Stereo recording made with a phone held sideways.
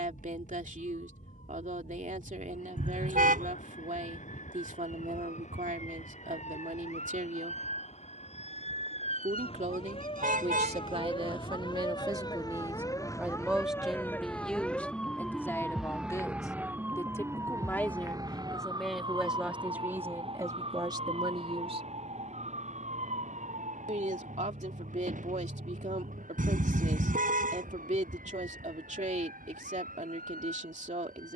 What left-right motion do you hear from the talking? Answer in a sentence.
In this clip you hear the talking move from right to left and back again.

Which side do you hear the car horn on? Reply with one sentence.
You can hear the car horn on the right.